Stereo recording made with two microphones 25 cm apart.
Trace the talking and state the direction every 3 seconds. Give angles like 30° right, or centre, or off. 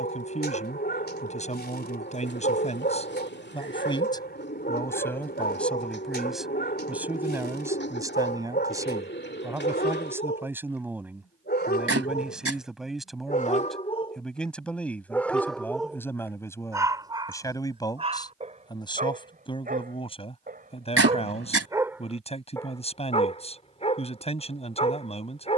30° left, 10° left, 10° right, 10° right, centre, 10° left, 20° left, 20° left, 20° left.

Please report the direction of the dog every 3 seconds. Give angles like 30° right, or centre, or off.
40° left, 40° left, 40° left, 40° left, 30° left, 10° right, 30° right, centre, 20° left.